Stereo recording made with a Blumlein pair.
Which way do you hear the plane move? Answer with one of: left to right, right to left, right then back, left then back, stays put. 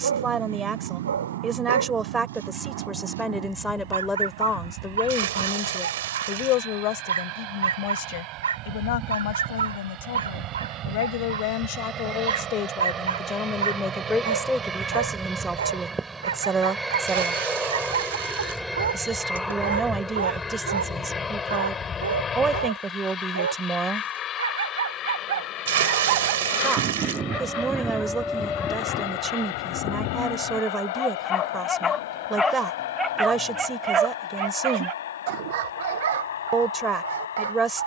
right to left.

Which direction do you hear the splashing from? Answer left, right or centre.
right.